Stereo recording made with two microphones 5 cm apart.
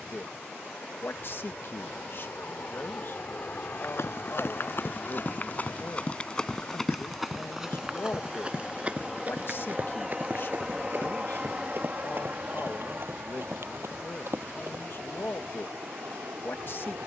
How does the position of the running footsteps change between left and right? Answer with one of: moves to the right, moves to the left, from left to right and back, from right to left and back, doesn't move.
moves to the right.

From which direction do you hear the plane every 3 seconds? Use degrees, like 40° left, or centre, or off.
50° left, 40° left, 10° left, 10° right, 40° right, 60° right.